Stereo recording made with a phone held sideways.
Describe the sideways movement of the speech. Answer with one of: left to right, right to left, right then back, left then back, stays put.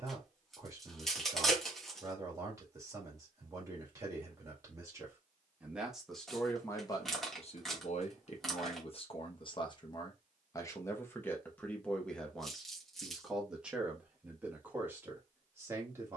left then back.